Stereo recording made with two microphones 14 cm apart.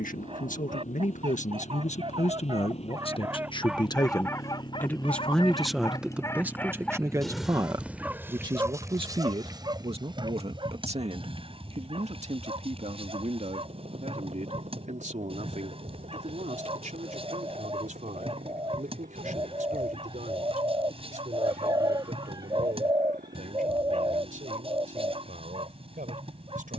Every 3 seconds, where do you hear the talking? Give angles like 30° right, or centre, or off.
60° left, 20° left, 20° right, 40° right, 50° right, 60° right, 60° right, 60° right, 70° right.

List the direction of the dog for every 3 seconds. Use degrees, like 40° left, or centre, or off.
40° right, 20° left, centre, 40° right, 40° right, 40° right, 40° right, 40° right, 40° right.